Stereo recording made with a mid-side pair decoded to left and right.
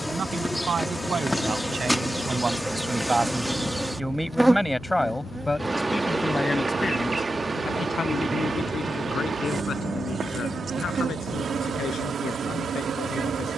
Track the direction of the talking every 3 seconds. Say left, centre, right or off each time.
right, centre, left, left, left.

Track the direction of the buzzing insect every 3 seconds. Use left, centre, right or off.
centre, centre, right, right, right.